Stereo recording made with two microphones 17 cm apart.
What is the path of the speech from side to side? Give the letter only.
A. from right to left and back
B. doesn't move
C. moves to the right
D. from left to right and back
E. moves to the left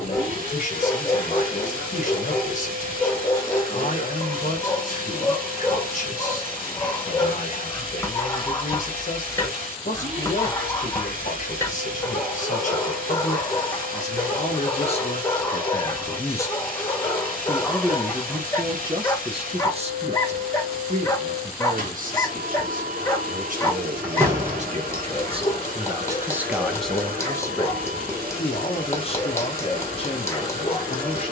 D.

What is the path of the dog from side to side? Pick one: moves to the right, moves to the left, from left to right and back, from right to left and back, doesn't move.
doesn't move.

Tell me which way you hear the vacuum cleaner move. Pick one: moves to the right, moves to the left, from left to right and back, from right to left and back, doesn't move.
doesn't move.